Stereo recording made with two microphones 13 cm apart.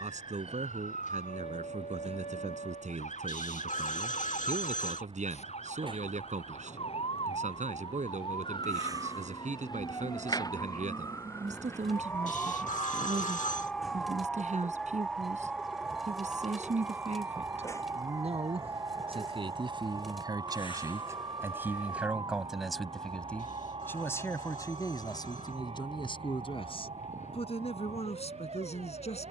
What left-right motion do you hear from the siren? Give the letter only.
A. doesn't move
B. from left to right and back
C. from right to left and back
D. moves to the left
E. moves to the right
E.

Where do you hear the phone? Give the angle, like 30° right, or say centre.
60° left.